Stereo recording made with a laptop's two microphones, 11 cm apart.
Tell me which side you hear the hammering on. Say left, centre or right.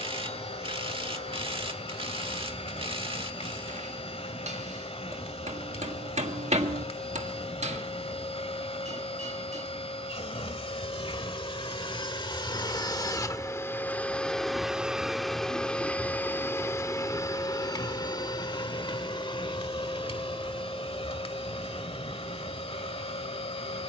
right.